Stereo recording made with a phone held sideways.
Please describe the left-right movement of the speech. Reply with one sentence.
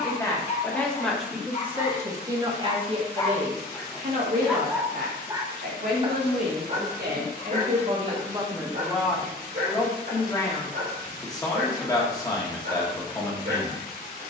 You can hear the speech move from left to right and back again.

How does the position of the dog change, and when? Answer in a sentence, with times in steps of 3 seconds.
You can hear the dog on the left from 0 s, in the centre from 3 s and on the right from 6 s.